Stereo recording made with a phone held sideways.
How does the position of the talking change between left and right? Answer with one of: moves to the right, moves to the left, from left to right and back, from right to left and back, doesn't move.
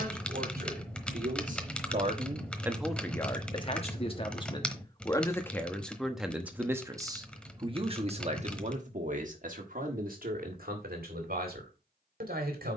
from right to left and back.